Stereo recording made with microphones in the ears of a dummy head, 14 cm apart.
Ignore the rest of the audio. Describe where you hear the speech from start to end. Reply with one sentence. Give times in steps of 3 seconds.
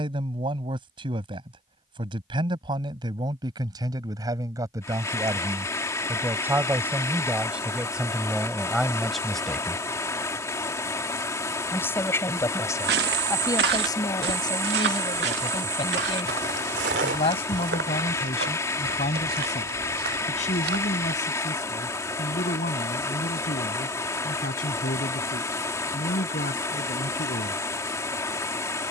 You can hear the speech on the right from 0 s, in the centre from 6 s and on the left from 12 s.